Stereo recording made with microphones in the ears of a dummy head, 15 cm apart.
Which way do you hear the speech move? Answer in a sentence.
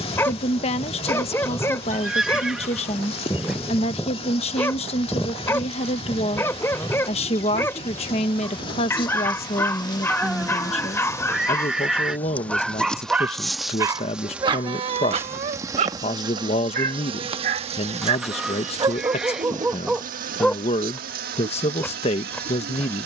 In this clip you hear the speech stay in one place.